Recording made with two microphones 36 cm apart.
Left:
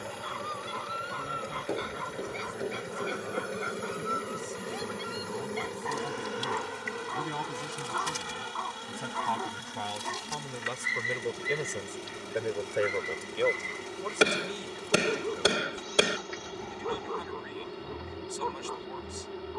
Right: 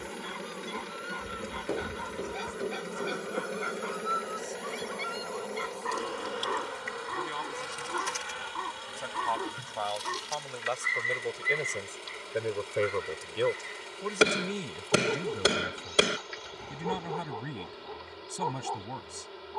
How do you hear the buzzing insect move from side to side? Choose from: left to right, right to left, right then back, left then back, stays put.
right to left.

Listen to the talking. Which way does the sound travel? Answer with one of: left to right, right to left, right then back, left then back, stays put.
left to right.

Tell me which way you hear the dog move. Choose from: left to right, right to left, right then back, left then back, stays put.
right then back.